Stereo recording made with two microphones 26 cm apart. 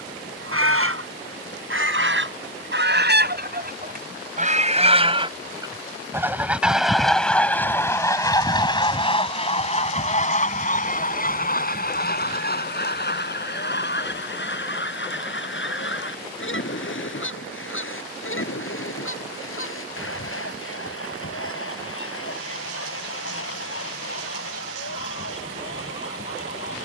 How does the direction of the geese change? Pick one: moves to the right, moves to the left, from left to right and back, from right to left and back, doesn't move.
moves to the left.